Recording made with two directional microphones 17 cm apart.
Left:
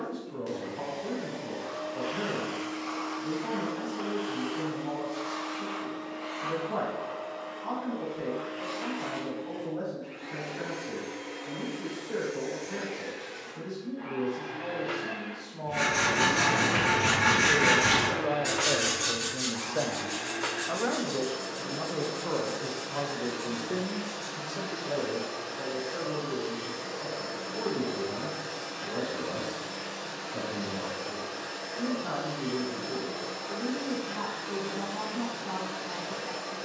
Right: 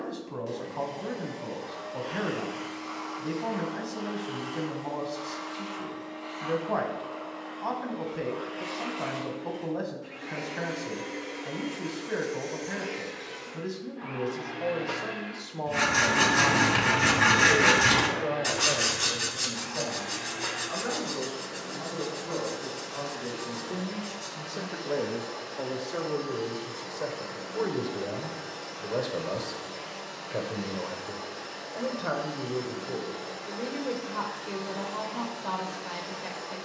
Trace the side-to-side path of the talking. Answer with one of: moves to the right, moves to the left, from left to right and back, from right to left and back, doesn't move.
from right to left and back.